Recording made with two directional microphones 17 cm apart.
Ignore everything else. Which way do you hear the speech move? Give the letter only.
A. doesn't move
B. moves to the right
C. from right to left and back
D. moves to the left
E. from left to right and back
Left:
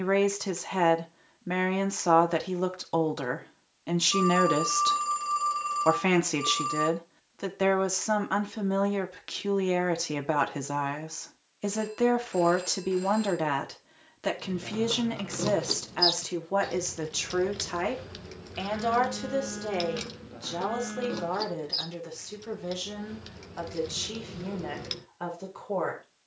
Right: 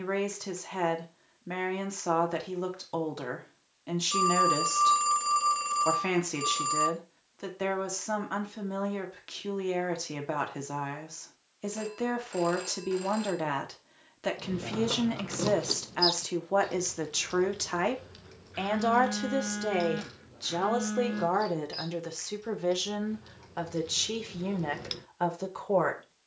B.